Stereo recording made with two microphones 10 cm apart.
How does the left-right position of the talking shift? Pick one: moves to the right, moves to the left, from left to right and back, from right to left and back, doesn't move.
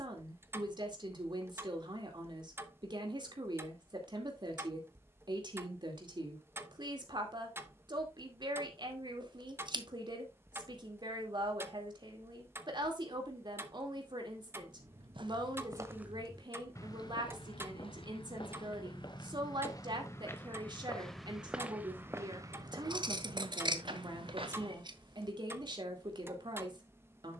doesn't move.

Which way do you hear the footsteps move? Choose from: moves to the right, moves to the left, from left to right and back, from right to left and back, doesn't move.
from right to left and back.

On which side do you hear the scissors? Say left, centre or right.
right.